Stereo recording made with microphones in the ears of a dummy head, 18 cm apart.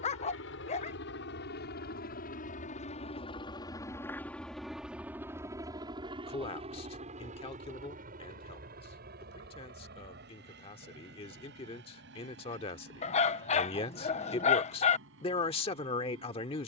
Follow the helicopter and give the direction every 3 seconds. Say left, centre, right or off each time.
left, centre, right, right, right, right.